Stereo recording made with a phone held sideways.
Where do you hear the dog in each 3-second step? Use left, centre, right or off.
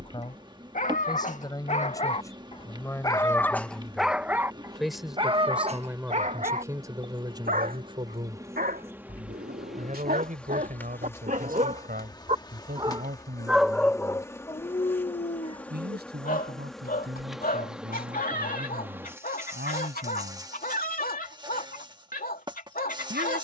left, centre, right, right, centre, left, left, left.